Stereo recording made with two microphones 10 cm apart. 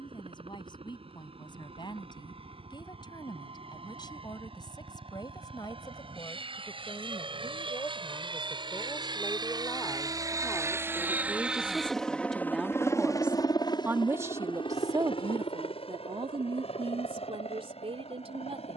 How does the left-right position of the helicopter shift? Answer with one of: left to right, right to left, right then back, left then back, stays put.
right to left.